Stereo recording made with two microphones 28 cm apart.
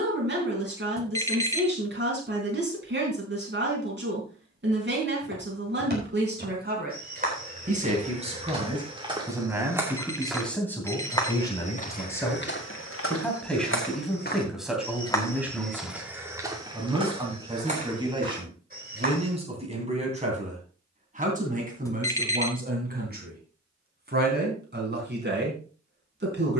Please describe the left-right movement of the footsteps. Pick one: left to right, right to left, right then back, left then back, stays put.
left then back.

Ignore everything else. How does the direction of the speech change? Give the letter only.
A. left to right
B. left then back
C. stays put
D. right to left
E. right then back
B.